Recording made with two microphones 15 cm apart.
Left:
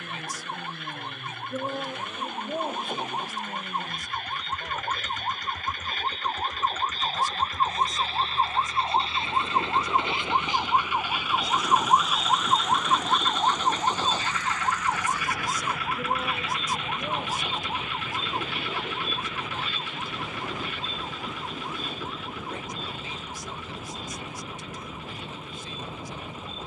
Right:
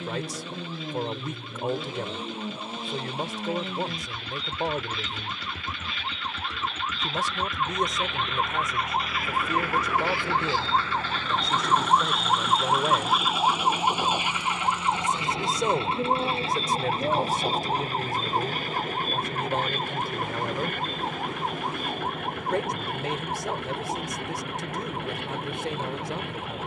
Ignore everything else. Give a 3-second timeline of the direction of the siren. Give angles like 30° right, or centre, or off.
60° left, 50° left, 40° left, 20° left, 10° right, 30° right, 50° right, 50° right, 60° right.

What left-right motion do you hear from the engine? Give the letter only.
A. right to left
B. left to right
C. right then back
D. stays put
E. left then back
D.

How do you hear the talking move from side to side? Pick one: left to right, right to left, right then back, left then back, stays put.
stays put.